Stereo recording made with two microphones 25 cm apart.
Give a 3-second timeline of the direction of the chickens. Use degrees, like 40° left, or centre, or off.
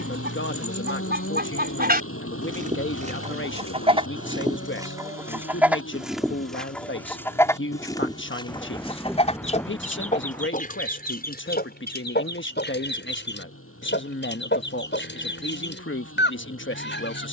40° right, 20° right, 10° left, 30° left, 50° left, 50° left.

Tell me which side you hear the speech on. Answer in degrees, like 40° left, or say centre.
50° left.